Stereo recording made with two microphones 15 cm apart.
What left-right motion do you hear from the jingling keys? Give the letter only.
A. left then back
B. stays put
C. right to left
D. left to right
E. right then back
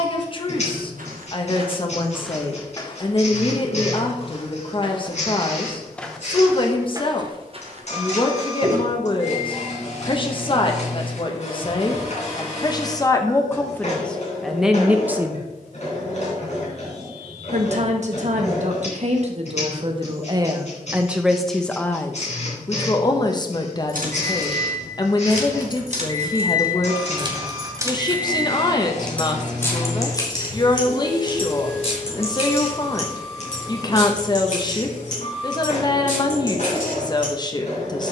C.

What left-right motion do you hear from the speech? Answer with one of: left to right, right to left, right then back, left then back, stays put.
right then back.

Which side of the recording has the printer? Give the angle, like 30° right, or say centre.
50° left.